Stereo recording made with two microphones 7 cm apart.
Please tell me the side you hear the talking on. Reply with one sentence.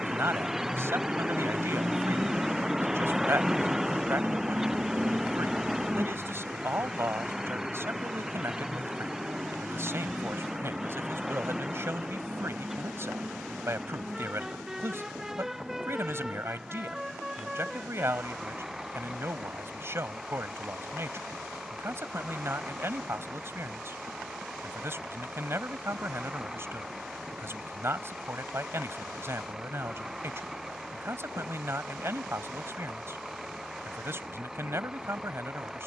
You can hear the talking on the right.